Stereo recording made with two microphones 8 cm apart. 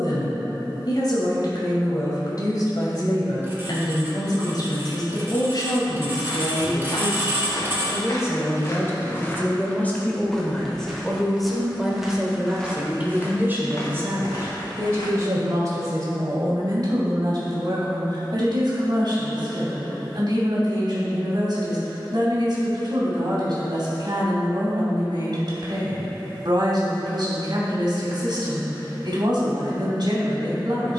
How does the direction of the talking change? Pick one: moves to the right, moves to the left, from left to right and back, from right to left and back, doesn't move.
moves to the right.